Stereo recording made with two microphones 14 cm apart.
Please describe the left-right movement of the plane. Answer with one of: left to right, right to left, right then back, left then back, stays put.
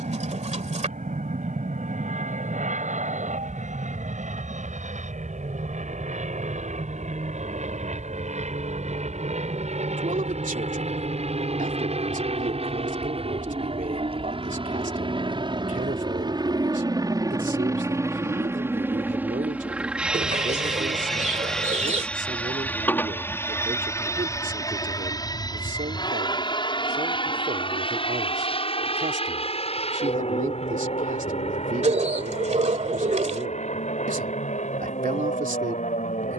right to left.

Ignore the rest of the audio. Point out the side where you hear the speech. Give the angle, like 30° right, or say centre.
80° right.